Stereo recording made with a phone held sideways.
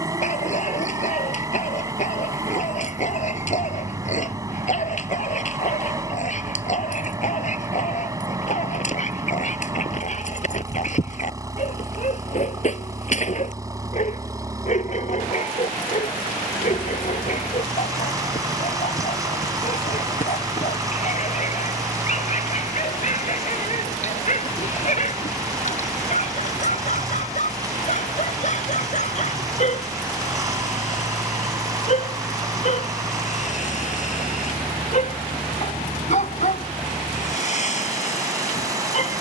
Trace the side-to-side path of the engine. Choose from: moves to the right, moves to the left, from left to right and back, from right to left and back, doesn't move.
doesn't move.